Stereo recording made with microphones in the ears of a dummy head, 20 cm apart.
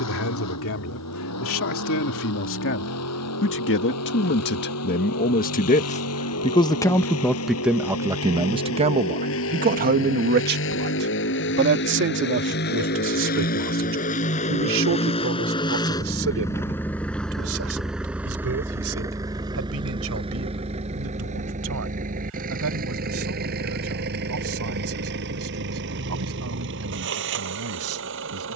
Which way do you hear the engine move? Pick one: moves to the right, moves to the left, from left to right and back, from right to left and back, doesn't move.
moves to the right.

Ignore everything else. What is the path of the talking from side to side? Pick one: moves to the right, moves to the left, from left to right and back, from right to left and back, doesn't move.
moves to the right.